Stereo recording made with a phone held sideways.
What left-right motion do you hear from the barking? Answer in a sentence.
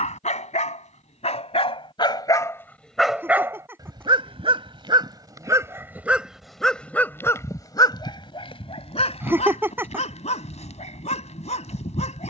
In this clip you hear the barking go right and come back.